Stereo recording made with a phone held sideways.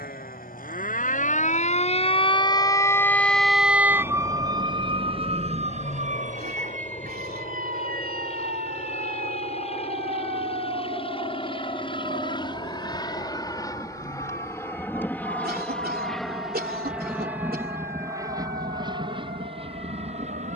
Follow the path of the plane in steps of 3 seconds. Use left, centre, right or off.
left, left, left, left, left, centre, right.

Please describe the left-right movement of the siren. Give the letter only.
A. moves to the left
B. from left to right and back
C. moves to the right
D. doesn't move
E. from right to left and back
C.